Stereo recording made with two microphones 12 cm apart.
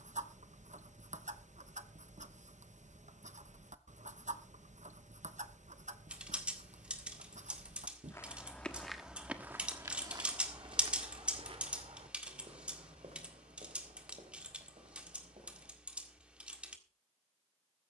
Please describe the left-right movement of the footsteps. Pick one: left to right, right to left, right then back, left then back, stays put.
left to right.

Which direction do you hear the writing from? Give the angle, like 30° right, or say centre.
80° right.